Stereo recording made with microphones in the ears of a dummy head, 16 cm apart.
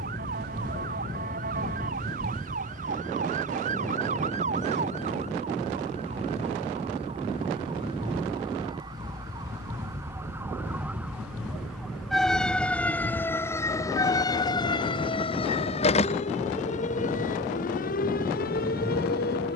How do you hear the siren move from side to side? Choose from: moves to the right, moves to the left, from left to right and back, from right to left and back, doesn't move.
moves to the left.